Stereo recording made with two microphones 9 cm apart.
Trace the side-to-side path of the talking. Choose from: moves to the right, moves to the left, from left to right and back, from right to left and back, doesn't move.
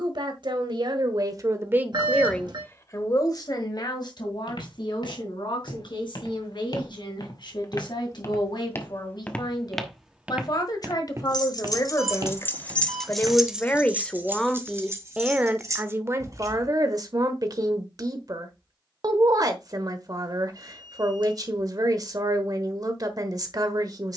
from right to left and back.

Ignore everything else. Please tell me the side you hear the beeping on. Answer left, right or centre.
right.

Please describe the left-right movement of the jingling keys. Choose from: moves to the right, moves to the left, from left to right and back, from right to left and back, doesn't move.
moves to the right.